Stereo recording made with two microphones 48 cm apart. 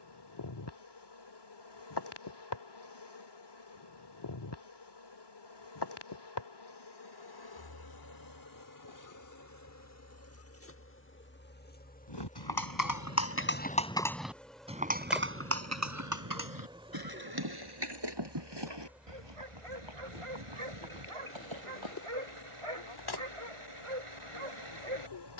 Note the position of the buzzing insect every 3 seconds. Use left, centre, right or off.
left, left, left, left, centre, centre, centre, left, left.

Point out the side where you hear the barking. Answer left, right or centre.
right.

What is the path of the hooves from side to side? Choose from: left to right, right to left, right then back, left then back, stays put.
left to right.